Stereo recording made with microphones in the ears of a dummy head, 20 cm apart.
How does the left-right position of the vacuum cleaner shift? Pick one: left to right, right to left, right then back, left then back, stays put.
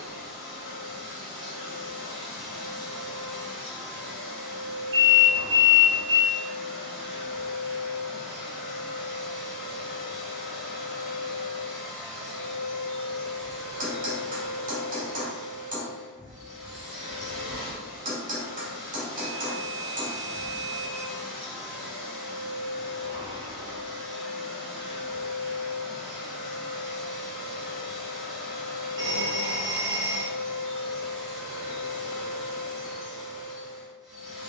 stays put.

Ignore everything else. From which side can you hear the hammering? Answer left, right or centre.
right.